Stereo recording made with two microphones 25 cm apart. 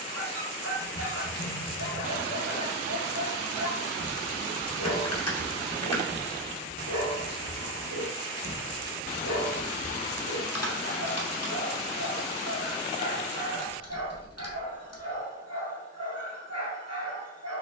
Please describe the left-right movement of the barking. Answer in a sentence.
You can hear the barking stay put.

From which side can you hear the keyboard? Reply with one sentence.
In this clip you hear the keyboard on the left.